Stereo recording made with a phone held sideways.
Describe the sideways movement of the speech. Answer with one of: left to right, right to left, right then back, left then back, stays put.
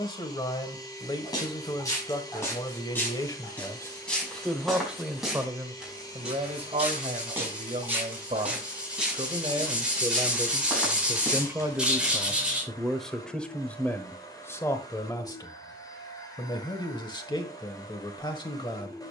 right then back.